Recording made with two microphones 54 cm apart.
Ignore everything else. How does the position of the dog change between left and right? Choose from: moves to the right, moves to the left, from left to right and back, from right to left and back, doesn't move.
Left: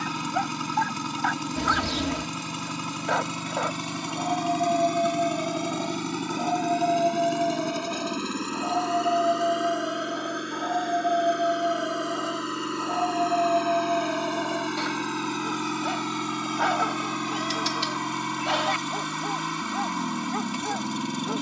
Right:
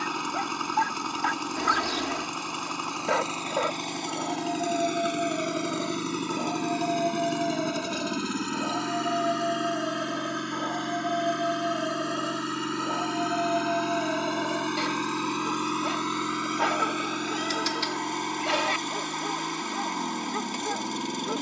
doesn't move.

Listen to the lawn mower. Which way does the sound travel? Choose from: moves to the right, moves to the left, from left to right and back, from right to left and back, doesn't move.
from left to right and back.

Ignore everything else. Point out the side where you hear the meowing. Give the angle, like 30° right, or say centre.
50° left.